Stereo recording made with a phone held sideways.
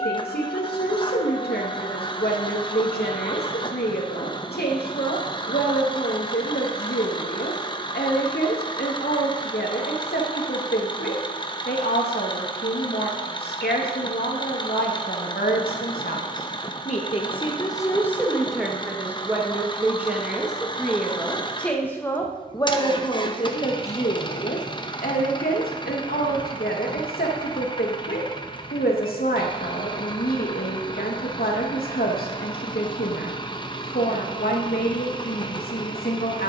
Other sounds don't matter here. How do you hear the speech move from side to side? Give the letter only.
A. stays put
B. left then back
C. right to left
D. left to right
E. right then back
E.